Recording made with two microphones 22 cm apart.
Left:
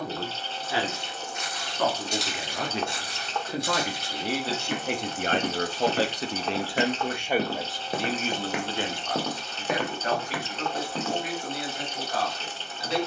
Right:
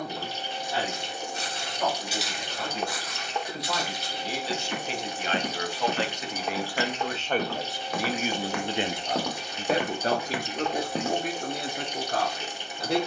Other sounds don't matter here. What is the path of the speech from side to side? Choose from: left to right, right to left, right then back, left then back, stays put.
left to right.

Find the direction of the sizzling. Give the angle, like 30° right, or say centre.
10° right.